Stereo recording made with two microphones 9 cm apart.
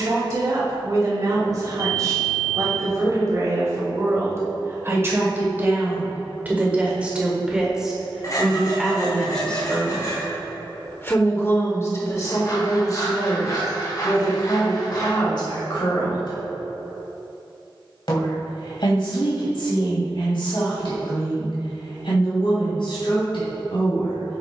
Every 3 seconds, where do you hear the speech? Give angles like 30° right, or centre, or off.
40° right, 30° right, 10° right, 20° left, 50° left, 60° left, 70° left, 70° left.